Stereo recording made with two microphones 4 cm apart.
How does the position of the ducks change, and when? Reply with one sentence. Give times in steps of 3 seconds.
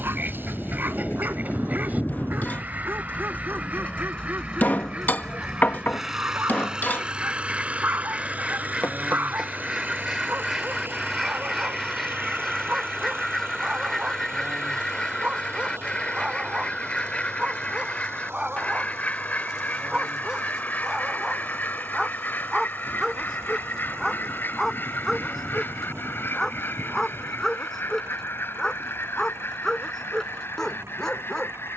You can hear the ducks on the right from 0 s, in the centre from 9 s and on the left from 15 s.